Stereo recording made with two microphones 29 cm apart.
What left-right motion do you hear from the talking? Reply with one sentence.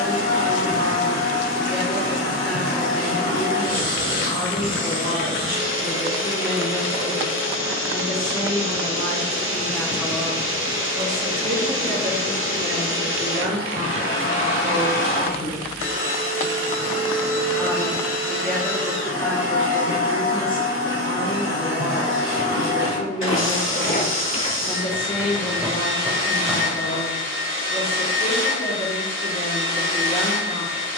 In this clip you hear the talking go right and come back.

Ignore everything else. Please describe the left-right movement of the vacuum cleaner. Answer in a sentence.
You can hear the vacuum cleaner stay put.